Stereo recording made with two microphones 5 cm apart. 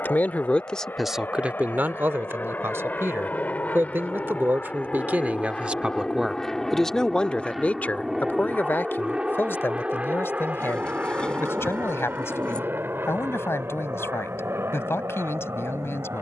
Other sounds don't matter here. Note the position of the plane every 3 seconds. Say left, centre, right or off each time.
left, left, centre, right, right, right.